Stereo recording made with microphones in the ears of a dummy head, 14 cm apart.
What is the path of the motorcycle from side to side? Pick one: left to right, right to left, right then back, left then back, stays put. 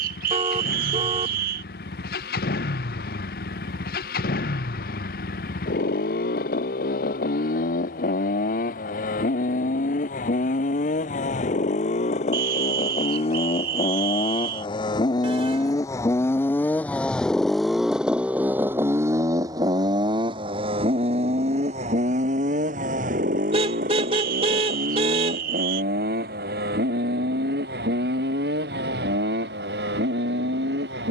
left to right.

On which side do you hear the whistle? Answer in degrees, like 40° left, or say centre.
60° right.